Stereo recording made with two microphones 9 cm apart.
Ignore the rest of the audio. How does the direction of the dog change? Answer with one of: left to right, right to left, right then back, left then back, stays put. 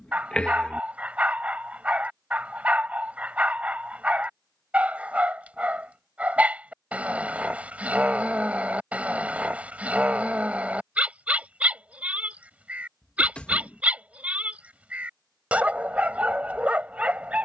stays put.